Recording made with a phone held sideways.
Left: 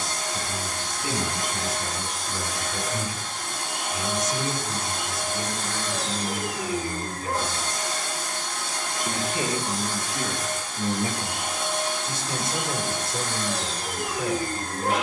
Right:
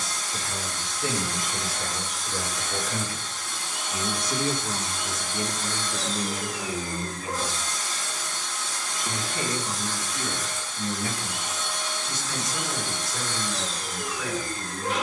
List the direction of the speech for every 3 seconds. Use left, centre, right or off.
right, right, right, left, left.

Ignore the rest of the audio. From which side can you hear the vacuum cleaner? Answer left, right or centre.
left.